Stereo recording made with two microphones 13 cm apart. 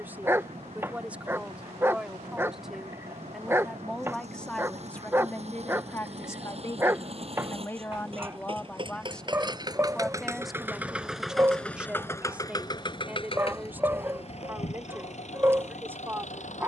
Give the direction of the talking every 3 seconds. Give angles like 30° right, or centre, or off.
10° right, 10° left, 20° left, centre, 10° right, 20° right.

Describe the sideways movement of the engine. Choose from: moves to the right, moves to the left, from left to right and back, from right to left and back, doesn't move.
moves to the left.